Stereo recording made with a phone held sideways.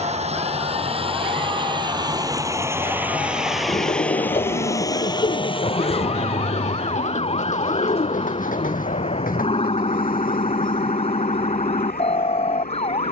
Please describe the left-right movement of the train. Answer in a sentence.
You can hear the train move from right to left.